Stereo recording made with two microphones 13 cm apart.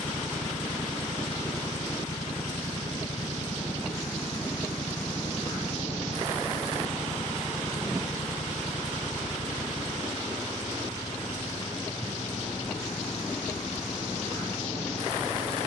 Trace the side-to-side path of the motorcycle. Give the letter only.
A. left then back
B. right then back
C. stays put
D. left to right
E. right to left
C.